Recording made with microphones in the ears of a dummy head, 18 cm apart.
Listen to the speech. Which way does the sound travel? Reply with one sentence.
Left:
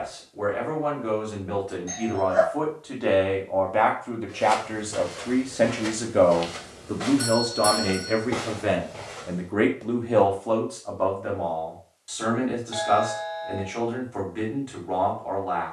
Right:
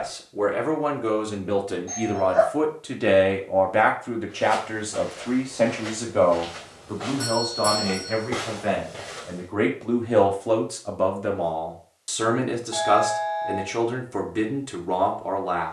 You can hear the speech go left and come back.